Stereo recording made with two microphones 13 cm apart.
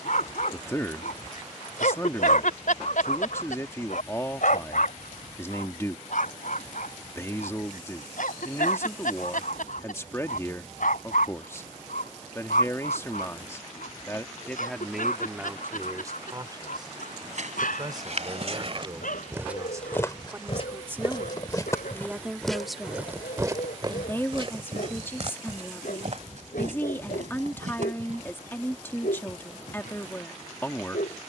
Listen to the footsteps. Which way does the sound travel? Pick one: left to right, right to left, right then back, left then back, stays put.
left then back.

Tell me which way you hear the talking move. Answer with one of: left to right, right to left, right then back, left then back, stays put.
right then back.